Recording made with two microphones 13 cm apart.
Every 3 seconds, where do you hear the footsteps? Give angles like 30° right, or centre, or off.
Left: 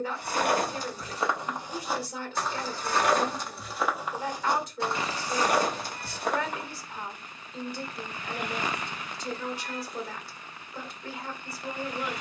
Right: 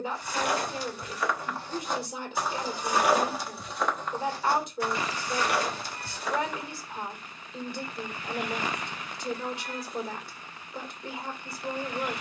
20° left, 20° left, 50° left, off.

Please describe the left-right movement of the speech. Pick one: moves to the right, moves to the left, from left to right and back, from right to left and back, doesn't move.
doesn't move.